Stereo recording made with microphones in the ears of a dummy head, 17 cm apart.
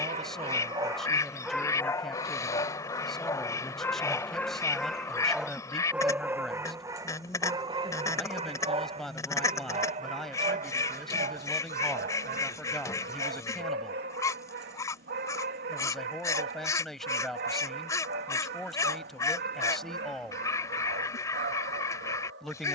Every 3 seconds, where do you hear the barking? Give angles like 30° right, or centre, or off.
centre, 10° left, 20° right, 40° right, 60° right, 60° right, 60° right, 60° right.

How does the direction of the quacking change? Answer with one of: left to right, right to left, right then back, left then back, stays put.
stays put.